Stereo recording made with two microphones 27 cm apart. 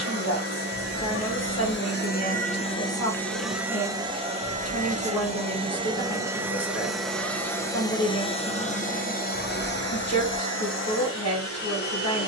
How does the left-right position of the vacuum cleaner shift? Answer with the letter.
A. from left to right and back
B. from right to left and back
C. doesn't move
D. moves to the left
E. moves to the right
A.